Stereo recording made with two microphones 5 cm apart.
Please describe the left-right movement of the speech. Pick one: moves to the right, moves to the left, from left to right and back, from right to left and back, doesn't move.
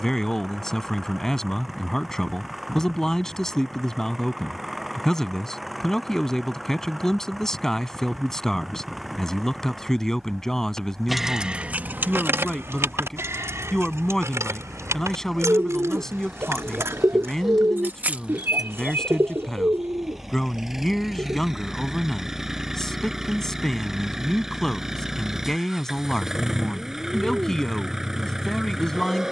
doesn't move.